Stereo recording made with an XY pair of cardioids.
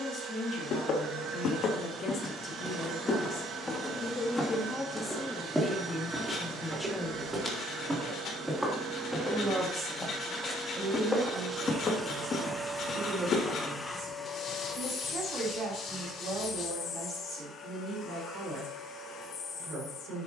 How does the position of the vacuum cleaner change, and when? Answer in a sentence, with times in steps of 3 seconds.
You can hear the vacuum cleaner on the right from 0 s, in the centre from 12 s and on the left from 15 s.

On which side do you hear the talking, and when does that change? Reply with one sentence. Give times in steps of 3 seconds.
You can hear the talking on the left from 0 s, in the centre from 6 s and on the right from 9 s.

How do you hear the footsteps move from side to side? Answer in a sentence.
In this clip you hear the footsteps go right and come back.